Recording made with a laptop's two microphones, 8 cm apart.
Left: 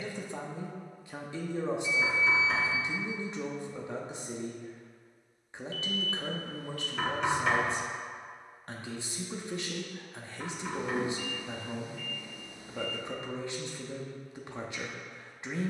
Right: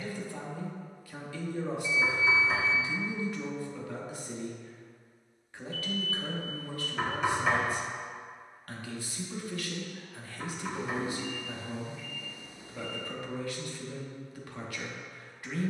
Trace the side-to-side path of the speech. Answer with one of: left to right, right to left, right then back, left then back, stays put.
stays put.